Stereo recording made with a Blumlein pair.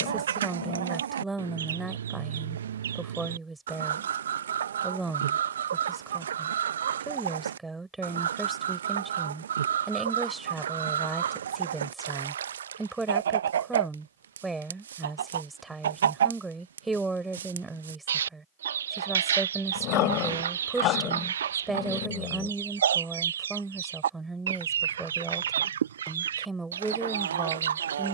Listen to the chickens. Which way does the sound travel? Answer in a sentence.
In this clip you hear the chickens stay in one place.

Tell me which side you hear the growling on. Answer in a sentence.
You can hear the growling on the left.